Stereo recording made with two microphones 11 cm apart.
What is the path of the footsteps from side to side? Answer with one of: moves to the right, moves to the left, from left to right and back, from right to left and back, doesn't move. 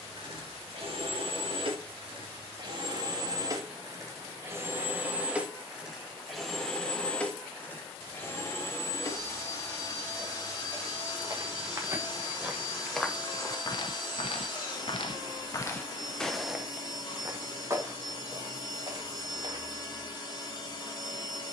from right to left and back.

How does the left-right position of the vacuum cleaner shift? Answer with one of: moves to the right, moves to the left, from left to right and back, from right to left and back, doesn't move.
moves to the left.